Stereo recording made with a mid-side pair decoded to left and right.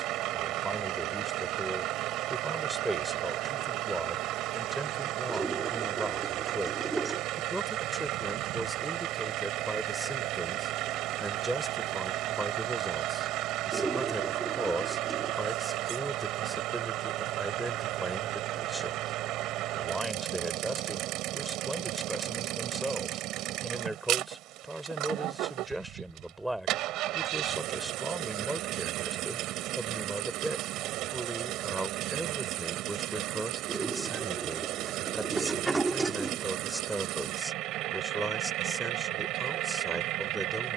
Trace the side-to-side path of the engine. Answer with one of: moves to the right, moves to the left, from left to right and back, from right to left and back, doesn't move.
doesn't move.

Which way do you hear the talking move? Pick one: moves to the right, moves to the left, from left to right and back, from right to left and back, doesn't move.
doesn't move.